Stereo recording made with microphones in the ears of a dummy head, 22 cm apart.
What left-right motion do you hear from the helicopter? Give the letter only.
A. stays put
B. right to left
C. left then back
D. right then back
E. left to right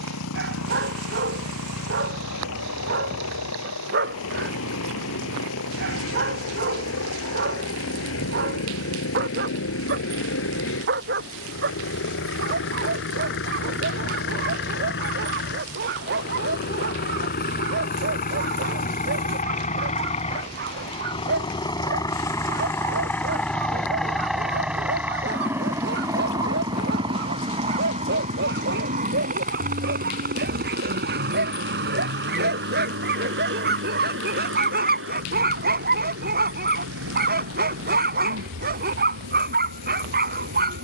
E.